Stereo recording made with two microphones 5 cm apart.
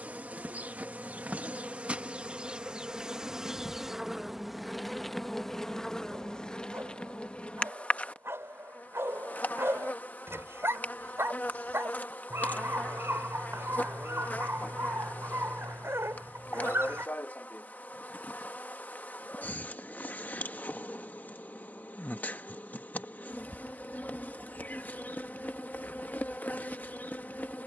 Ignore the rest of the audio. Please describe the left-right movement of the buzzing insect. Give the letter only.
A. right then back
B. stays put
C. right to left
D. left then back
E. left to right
C.